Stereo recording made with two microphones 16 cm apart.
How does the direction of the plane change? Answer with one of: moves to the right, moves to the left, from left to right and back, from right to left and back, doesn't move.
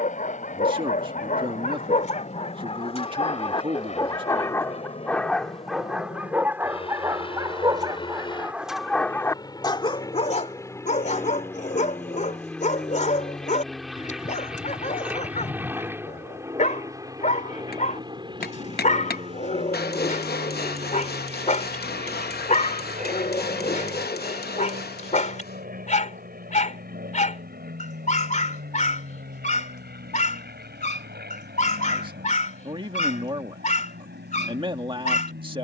moves to the right.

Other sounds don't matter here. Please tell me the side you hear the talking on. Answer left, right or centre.
right.